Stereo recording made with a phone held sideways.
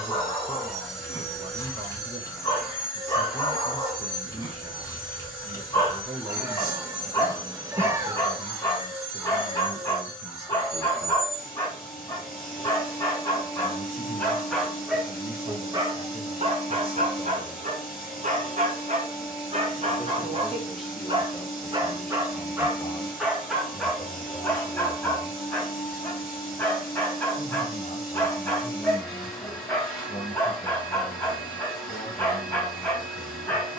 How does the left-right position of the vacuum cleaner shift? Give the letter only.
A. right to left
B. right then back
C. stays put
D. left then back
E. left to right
C.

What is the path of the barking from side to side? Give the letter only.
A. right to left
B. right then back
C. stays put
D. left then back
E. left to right
B.